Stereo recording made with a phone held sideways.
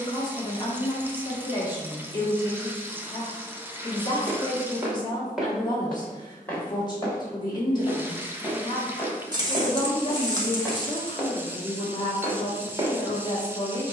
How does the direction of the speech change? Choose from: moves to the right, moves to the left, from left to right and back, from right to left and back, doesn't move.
doesn't move.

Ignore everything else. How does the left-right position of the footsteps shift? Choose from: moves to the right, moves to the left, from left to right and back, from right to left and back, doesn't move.
from right to left and back.